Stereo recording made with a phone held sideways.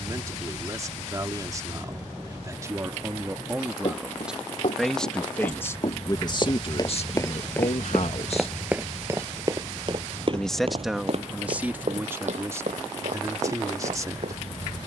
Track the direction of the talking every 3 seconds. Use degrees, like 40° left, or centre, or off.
30° right, centre, 50° left, 10° right, 20° right.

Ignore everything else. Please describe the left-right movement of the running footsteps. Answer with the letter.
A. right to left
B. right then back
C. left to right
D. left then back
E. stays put
C.